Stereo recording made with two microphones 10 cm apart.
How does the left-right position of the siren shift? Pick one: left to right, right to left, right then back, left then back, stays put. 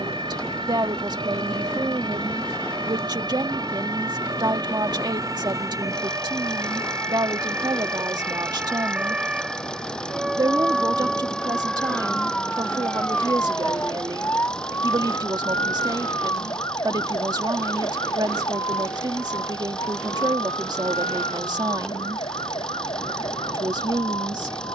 right to left.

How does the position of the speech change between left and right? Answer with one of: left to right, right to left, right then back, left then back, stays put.
stays put.